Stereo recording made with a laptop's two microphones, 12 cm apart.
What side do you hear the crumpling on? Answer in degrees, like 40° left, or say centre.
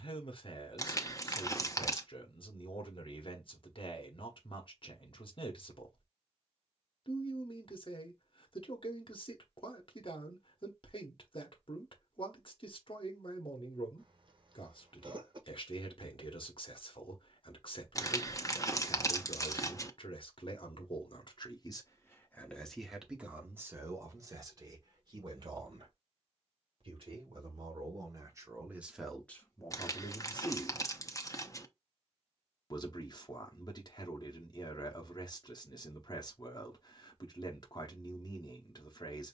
30° left.